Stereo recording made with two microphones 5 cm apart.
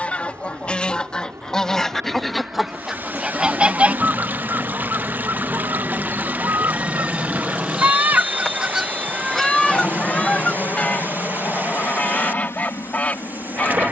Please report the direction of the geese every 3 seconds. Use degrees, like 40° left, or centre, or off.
10° left, 40° right, 50° right, 20° left, 30° left.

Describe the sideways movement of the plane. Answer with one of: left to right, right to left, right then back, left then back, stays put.
right to left.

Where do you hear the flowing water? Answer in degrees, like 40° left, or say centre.
30° right.